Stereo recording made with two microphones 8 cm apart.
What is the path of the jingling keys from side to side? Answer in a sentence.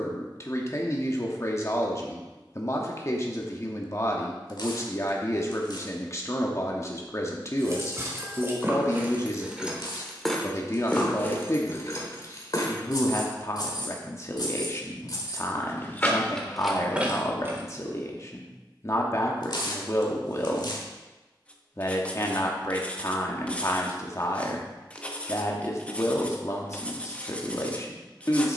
In this clip you hear the jingling keys move from right to left and back again.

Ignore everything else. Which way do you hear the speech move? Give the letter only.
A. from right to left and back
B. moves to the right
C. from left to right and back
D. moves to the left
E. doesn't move
E.